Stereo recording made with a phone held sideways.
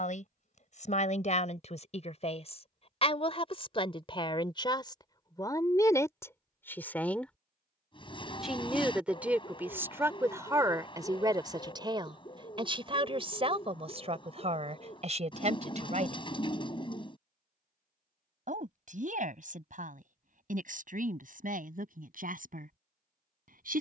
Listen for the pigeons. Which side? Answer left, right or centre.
left.